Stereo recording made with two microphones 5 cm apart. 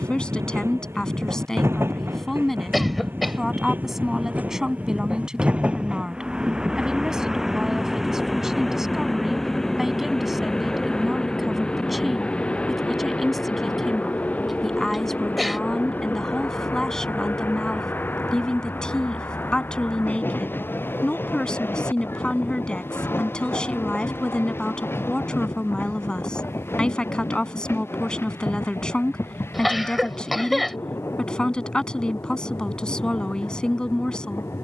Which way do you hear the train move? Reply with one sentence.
In this clip you hear the train go from the right side to the left.